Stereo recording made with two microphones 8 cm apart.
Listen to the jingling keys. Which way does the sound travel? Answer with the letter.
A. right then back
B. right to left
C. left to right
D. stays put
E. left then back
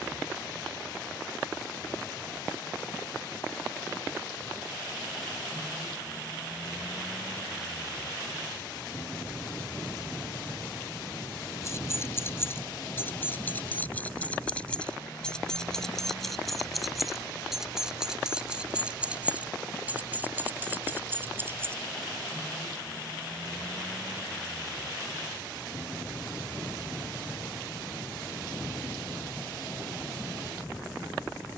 C.